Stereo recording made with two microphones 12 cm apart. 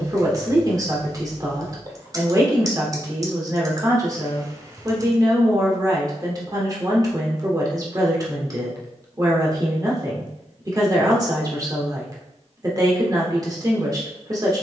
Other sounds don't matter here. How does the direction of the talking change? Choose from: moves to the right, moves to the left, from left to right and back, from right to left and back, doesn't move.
doesn't move.